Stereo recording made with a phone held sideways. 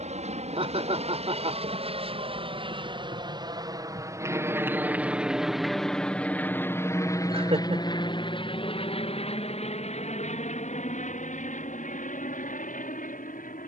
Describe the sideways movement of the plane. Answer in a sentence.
In this clip you hear the plane go from the right side to the left.